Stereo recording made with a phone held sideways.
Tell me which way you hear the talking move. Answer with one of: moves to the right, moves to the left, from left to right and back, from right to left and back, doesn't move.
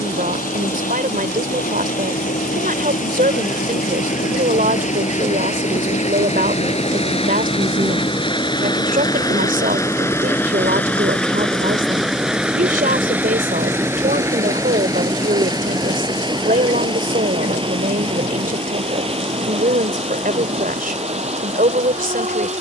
doesn't move.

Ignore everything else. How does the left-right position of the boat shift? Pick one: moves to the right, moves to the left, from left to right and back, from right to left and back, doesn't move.
moves to the right.